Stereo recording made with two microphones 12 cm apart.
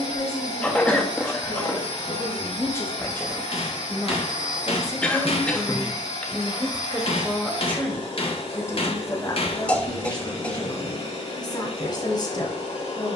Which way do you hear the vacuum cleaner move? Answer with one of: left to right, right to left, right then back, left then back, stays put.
stays put.